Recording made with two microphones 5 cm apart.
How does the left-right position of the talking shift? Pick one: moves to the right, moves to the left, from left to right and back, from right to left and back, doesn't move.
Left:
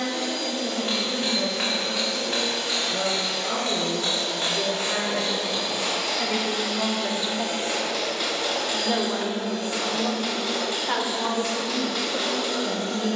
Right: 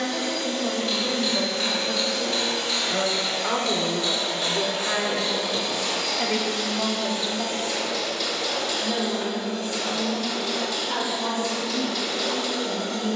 moves to the left.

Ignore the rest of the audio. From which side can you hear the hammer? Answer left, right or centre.
left.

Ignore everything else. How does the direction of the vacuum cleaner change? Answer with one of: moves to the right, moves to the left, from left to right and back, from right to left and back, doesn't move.
moves to the left.